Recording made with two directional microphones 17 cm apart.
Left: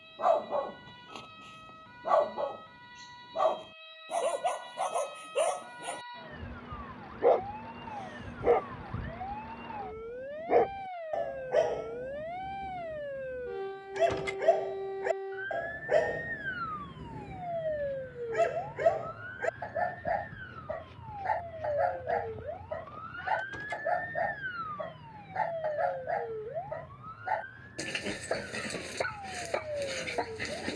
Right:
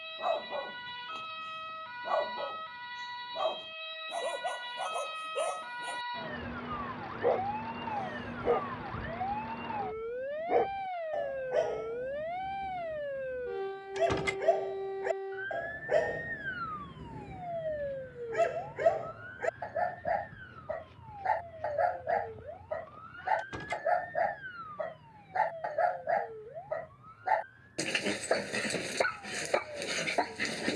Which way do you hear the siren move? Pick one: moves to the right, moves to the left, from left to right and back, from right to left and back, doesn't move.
moves to the left.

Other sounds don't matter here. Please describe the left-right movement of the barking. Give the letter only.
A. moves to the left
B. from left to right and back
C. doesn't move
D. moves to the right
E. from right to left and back
D.